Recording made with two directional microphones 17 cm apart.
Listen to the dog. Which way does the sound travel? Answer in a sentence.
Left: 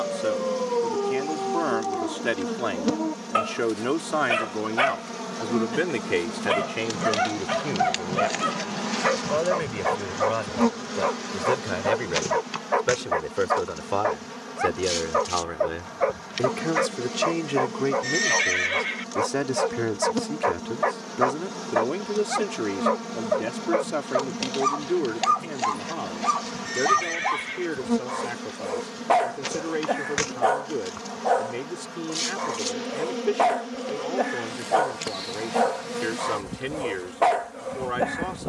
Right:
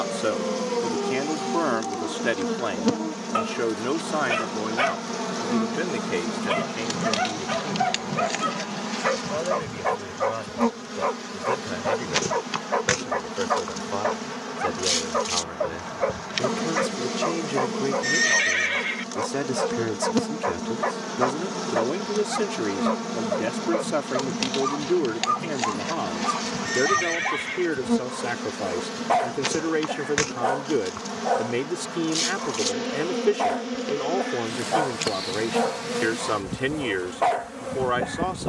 In this clip you hear the dog stay in one place.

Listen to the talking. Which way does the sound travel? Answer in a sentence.
You can hear the talking go left and come back.